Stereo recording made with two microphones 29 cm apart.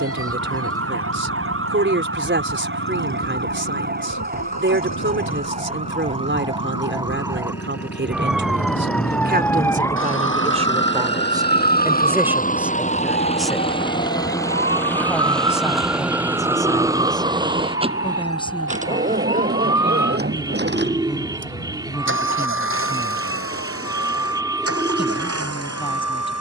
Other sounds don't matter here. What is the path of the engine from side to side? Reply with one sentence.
You can hear the engine move to the right.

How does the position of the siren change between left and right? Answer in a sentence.
You can hear the siren travel towards the left.